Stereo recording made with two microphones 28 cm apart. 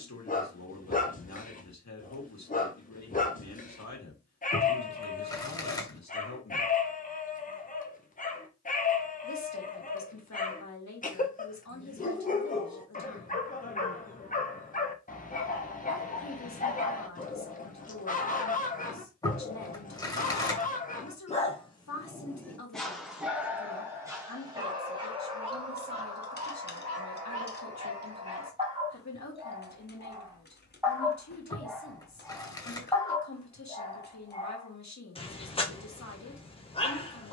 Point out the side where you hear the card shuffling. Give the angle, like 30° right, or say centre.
10° left.